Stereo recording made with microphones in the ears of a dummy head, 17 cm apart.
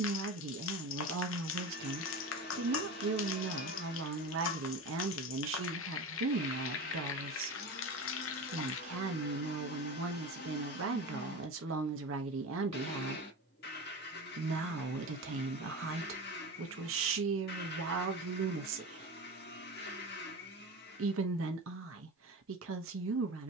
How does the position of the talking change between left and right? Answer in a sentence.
In this clip you hear the talking stay in one place.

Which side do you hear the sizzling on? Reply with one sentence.
You can hear the sizzling on the left.